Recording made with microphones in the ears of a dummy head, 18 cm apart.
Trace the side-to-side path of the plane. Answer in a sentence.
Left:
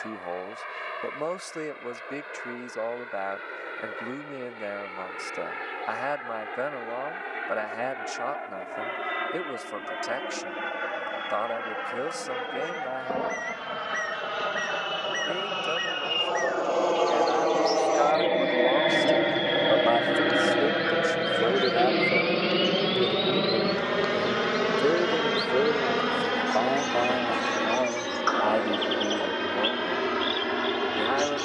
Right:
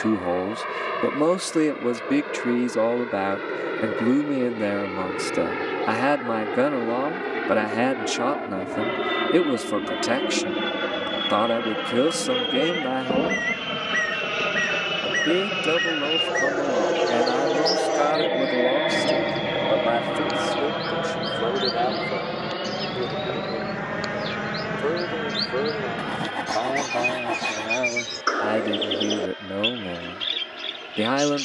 In this clip you hear the plane travel towards the left.